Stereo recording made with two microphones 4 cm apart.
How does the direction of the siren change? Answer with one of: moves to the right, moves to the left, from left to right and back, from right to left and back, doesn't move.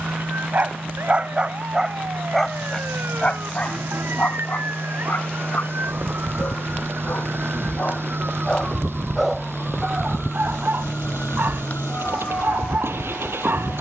moves to the left.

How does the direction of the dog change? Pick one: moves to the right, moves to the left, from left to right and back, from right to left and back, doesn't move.
from right to left and back.